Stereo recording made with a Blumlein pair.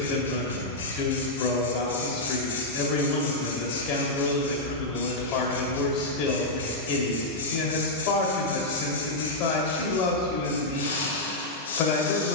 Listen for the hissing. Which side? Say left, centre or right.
left.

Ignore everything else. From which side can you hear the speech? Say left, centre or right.
left.